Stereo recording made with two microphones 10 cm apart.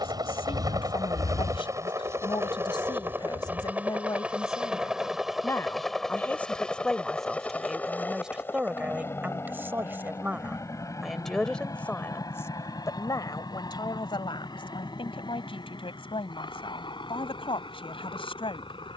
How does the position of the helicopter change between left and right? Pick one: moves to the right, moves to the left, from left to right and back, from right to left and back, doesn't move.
moves to the left.